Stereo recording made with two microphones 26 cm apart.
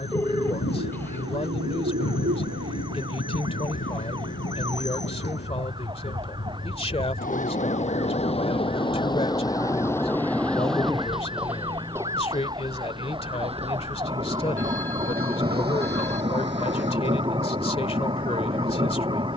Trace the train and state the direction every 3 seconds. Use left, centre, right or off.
left, left, left, centre, right, right, off.